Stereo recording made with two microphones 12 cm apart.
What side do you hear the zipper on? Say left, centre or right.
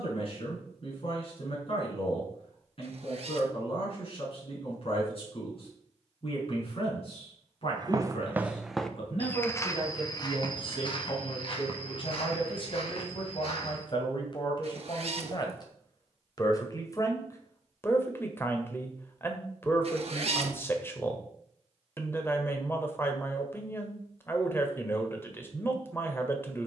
right.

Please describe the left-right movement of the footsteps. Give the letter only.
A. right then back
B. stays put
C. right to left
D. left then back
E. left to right
C.